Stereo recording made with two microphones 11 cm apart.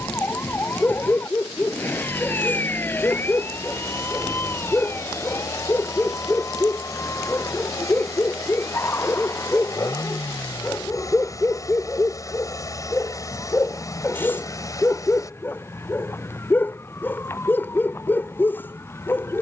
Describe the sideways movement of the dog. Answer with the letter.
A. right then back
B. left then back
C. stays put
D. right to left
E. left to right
C.